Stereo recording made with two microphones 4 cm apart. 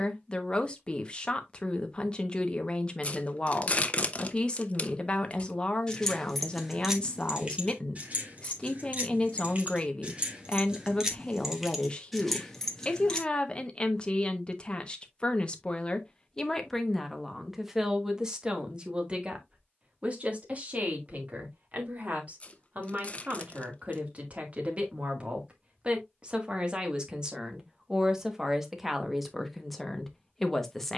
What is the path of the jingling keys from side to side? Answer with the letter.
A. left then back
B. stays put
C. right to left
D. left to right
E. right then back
E.